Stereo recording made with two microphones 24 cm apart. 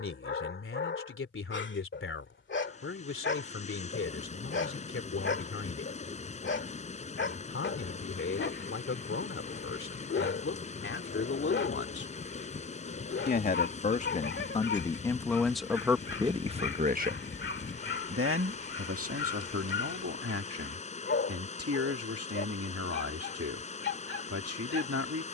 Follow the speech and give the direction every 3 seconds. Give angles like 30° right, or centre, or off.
60° left, 60° left, 60° left, 50° left, 30° left, 10° right, 70° right, 70° right, 70° right.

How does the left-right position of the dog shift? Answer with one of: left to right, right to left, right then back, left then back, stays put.
stays put.